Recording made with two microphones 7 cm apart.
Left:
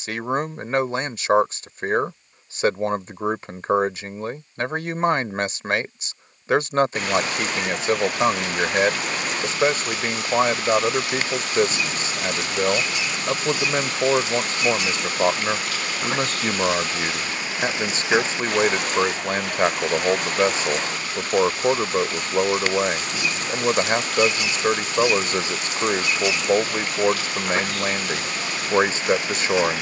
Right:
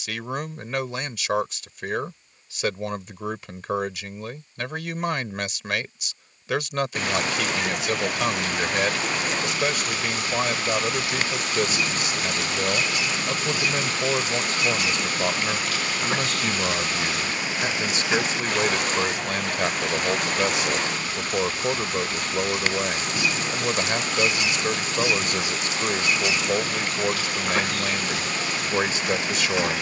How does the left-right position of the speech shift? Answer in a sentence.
In this clip you hear the speech stay in one place.